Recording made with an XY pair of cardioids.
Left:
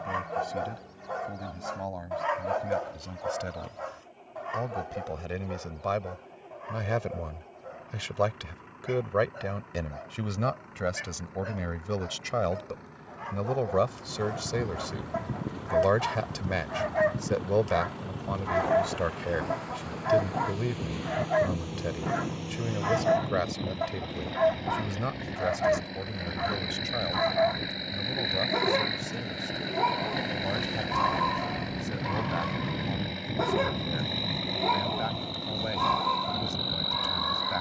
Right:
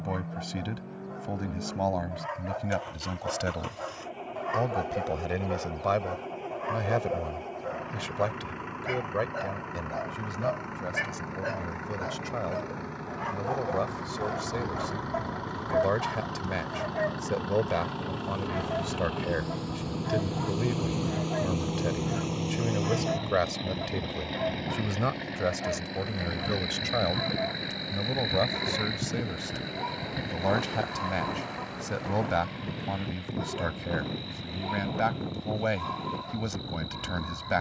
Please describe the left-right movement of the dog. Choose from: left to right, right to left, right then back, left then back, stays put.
right then back.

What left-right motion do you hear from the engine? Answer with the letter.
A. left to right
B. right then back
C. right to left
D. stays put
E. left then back
C.